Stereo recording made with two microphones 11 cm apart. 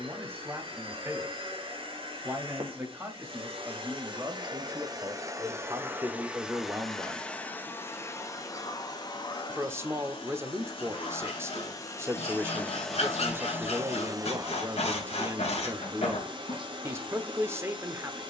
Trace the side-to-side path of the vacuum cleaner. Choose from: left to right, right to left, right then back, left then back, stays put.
left then back.